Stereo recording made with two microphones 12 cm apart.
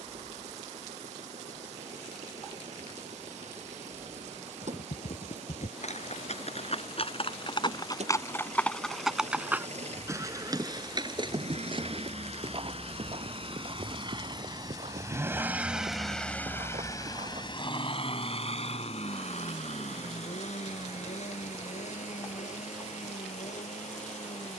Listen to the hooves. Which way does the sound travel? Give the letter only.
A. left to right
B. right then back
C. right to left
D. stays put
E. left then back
A.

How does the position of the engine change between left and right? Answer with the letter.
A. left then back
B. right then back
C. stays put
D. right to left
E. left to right
D.